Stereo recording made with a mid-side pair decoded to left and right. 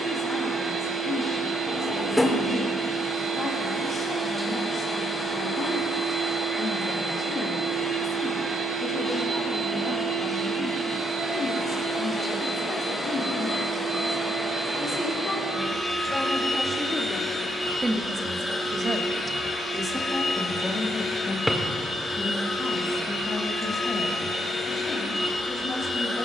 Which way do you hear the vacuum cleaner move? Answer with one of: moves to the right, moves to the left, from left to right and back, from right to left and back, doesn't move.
moves to the left.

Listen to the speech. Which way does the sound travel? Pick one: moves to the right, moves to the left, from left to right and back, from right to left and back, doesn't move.
from left to right and back.